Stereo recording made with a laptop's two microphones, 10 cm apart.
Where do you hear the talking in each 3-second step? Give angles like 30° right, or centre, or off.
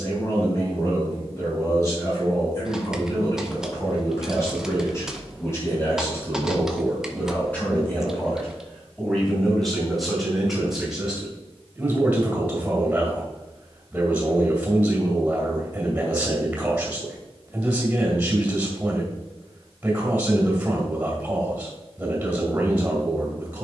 30° left, 30° left, 20° left, centre, 10° right, 10° right, 10° right, 10° right.